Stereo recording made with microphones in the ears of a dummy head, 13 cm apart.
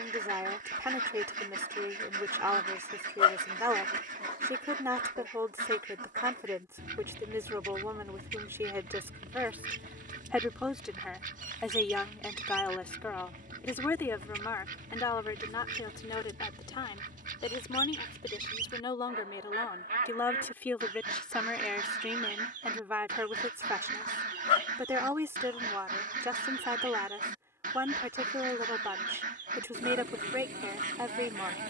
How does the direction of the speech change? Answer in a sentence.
In this clip you hear the speech move from right to left and back again.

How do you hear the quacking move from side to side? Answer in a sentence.
You can hear the quacking stay in one place.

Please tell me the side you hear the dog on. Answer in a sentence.
You can hear the dog on the left.